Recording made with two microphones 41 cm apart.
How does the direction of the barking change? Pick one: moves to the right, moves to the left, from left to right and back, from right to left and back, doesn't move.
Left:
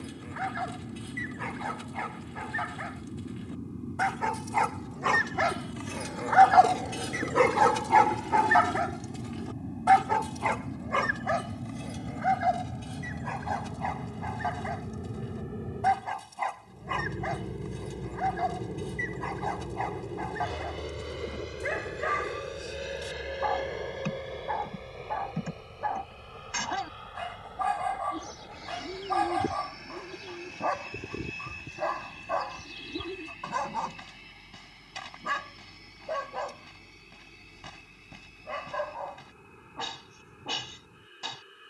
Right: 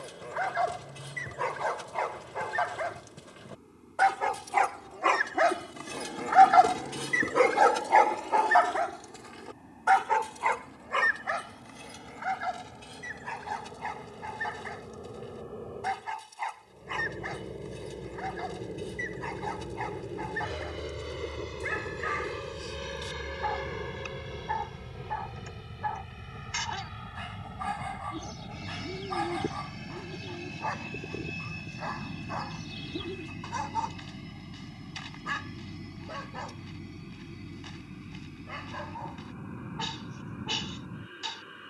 moves to the left.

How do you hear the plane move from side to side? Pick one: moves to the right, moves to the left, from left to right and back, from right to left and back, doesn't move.
moves to the right.